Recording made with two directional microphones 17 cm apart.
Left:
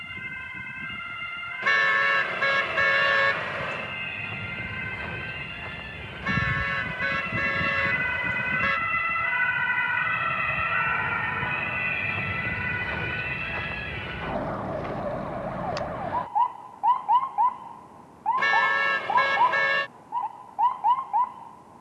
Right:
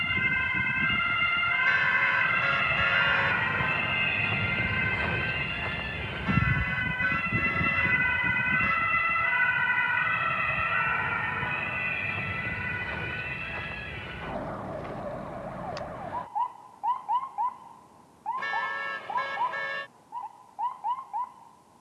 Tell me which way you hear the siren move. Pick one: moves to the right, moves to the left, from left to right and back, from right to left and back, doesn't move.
moves to the left.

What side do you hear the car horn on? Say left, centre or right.
left.